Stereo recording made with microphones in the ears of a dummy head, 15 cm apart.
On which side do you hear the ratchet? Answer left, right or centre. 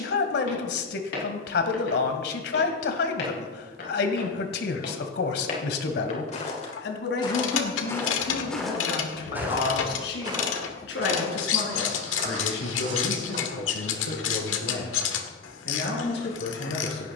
left.